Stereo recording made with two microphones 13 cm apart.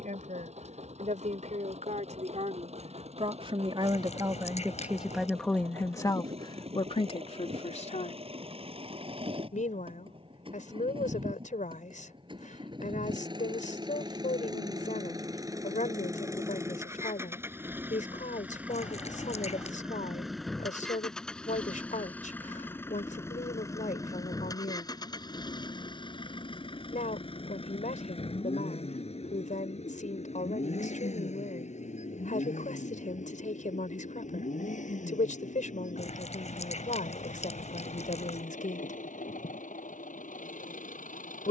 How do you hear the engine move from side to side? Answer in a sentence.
You can hear the engine move from right to left.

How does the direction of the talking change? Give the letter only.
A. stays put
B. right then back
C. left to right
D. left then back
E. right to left
E.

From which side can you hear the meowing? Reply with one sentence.
You can hear the meowing on the left.